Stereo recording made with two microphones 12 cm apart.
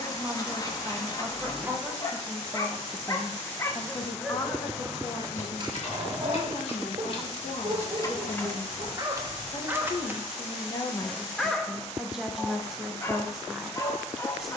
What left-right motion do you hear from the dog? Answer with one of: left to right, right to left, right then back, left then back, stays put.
right then back.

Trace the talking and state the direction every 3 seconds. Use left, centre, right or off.
centre, left, left, left, centre.